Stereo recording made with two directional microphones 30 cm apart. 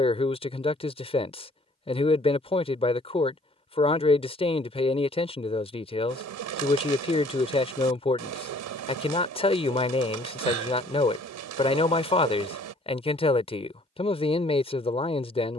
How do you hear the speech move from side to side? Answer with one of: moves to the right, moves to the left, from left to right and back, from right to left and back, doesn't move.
doesn't move.